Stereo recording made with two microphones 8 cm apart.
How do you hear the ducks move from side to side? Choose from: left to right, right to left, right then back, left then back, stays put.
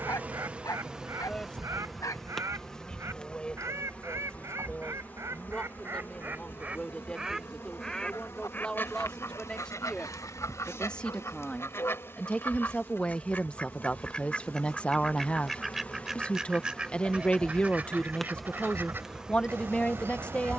left then back.